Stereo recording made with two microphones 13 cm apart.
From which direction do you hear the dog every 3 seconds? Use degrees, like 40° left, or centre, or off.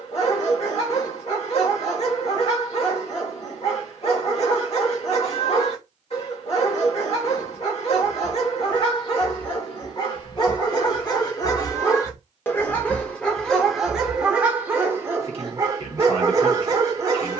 50° left, 50° left, 50° left, 40° left, centre, 20° right.